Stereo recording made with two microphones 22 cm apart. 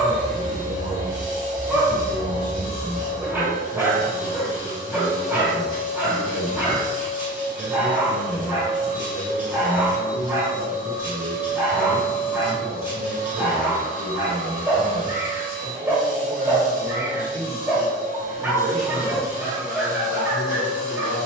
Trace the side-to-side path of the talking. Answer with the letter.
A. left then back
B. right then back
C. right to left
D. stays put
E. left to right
C.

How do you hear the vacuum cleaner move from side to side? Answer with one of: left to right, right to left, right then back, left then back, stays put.
stays put.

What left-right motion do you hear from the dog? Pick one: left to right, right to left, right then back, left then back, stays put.
stays put.